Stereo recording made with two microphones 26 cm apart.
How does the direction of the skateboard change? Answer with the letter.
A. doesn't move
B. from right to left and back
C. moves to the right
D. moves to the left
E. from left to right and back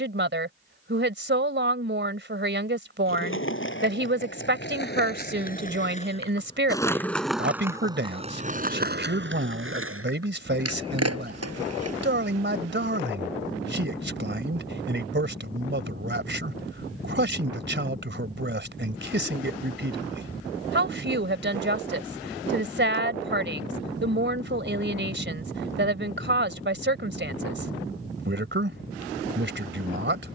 C.